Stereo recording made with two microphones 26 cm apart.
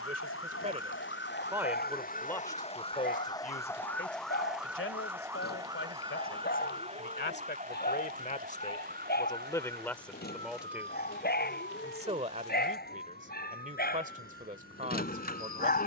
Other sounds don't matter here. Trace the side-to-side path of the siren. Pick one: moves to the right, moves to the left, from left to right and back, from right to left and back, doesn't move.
moves to the right.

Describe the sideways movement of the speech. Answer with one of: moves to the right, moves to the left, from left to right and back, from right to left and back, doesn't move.
from right to left and back.